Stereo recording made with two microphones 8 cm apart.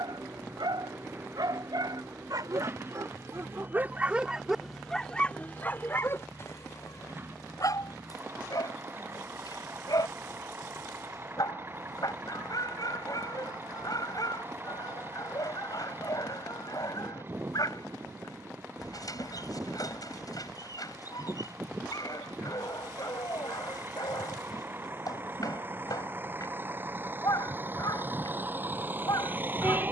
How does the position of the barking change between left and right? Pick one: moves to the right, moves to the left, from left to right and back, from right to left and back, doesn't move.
moves to the left.